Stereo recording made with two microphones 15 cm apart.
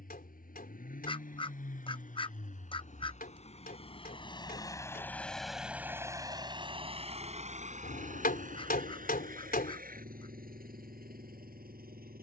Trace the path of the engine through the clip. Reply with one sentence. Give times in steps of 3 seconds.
You can hear the engine on the left from 0 s and on the right from 6 s.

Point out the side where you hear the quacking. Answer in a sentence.
In this clip you hear the quacking on the left.